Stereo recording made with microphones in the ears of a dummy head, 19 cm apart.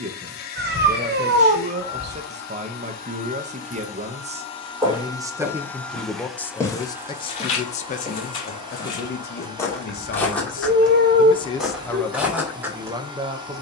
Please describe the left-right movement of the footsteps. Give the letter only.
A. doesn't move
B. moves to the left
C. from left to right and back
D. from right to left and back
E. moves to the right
D.